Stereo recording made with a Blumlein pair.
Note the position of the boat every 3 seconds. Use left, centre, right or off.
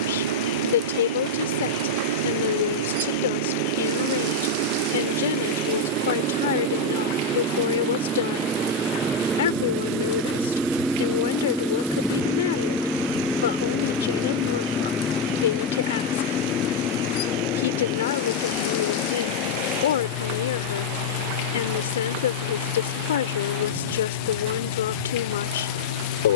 right, right, right, centre, centre, left, left, left, left.